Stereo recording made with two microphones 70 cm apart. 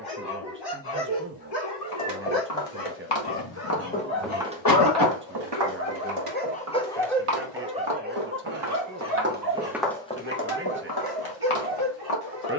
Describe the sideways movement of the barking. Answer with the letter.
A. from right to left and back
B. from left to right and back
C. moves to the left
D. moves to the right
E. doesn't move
D.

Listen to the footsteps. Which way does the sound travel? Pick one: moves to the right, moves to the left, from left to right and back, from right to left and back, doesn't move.
from left to right and back.